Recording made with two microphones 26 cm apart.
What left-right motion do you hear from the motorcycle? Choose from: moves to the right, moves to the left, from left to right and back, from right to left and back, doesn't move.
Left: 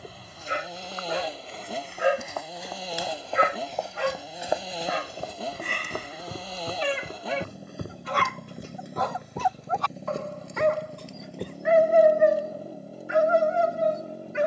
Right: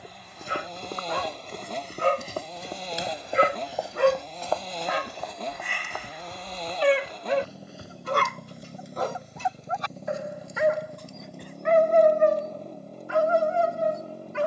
doesn't move.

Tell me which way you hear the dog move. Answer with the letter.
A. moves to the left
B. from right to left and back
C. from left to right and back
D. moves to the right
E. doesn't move
C.